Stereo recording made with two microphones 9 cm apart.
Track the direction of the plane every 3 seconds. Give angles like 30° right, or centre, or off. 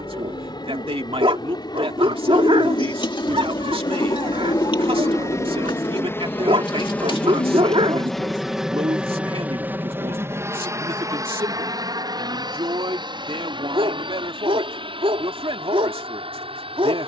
60° left, 40° left, 10° left, 30° right, 50° right, 60° right.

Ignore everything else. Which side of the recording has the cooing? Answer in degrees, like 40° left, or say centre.
60° left.